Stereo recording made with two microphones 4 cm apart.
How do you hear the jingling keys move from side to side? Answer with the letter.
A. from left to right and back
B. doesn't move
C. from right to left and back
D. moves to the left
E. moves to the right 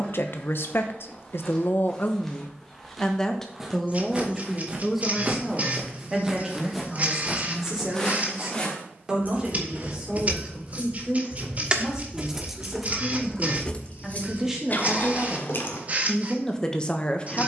D.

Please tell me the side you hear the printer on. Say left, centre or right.
right.